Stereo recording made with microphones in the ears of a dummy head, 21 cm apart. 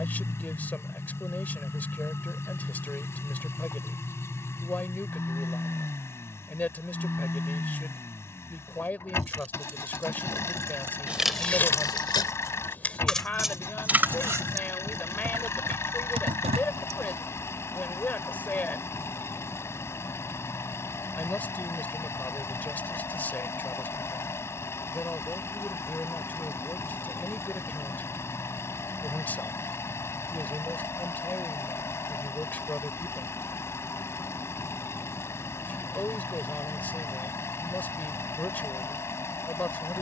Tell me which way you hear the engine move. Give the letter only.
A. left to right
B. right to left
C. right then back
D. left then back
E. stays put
E.